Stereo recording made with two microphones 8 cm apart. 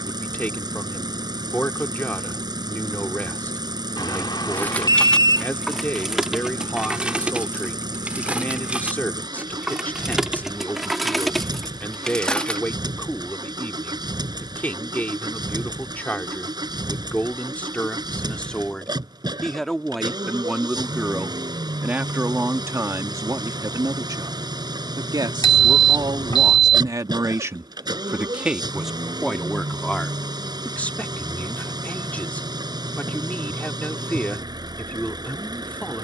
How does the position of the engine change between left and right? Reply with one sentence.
You can hear the engine stay put.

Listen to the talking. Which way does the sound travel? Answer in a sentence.
In this clip you hear the talking go right and come back.